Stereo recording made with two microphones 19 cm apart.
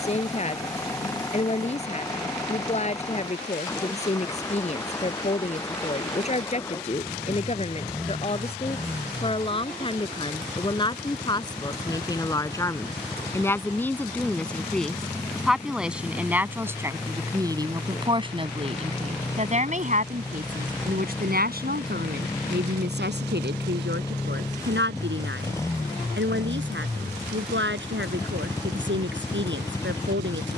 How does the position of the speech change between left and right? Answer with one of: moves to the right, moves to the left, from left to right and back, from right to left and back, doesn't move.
moves to the right.